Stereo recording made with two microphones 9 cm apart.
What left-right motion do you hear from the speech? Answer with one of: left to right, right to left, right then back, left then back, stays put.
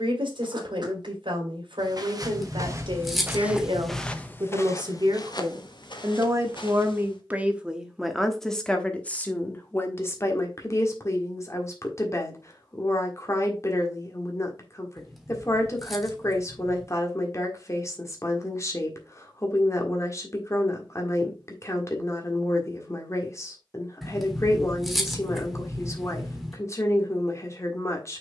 right to left.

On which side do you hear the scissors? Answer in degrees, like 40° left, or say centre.
centre.